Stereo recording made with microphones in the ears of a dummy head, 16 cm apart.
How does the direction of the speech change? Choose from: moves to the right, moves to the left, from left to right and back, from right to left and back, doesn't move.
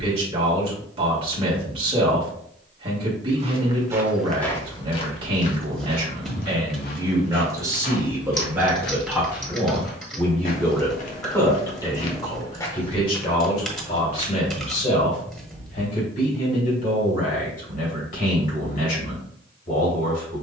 moves to the left.